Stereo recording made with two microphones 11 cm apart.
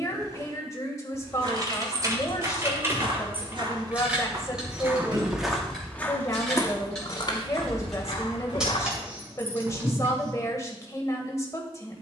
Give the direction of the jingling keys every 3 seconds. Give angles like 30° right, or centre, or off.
30° right, 10° right, centre, 20° right.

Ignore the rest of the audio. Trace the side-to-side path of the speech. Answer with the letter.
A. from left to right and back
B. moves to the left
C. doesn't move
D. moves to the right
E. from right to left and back
C.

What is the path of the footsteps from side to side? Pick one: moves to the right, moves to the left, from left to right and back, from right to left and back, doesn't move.
moves to the left.